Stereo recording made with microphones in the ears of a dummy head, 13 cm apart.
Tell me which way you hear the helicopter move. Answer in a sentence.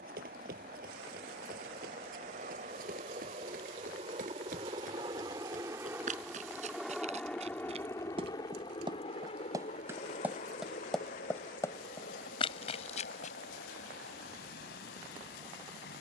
In this clip you hear the helicopter travel towards the left.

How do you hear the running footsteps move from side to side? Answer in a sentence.
You can hear the running footsteps travel towards the left.